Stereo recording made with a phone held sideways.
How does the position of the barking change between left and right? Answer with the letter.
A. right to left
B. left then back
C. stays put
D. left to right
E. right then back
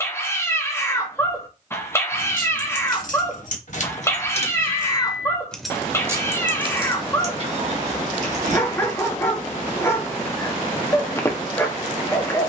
C.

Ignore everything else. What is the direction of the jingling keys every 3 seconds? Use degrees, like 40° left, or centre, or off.
70° left, 40° left, 40° right, off.